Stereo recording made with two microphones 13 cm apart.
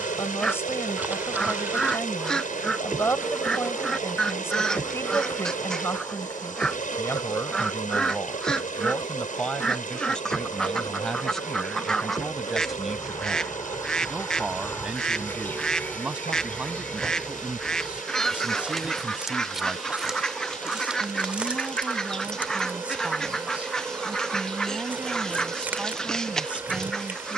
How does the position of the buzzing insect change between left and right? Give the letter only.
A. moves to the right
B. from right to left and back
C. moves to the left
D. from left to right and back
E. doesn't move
B.